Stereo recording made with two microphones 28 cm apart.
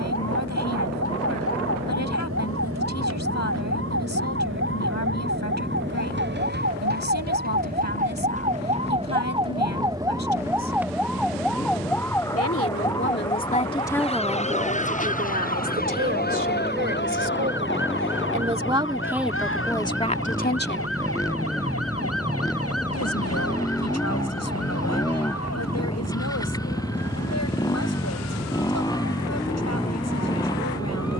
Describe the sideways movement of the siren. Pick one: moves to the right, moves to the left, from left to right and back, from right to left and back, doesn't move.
moves to the left.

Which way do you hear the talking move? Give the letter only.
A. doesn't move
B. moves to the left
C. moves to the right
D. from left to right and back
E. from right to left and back
D.